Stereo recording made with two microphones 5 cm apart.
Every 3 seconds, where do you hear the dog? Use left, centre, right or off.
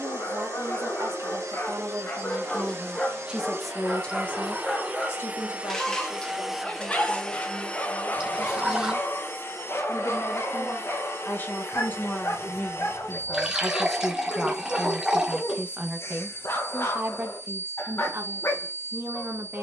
left, centre, left, left, left, left, left.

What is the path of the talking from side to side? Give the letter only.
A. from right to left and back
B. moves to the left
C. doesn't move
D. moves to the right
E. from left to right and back
A.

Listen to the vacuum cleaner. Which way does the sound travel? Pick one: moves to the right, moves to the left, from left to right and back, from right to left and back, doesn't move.
moves to the left.